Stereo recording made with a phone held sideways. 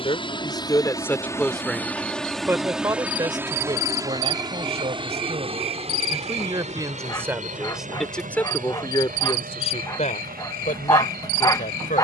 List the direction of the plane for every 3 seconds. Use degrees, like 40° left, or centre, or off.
10° left, 20° right, 40° right, 60° right.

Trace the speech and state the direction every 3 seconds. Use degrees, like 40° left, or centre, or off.
10° left, 30° right, 10° right, 50° left.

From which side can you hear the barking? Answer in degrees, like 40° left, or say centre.
20° left.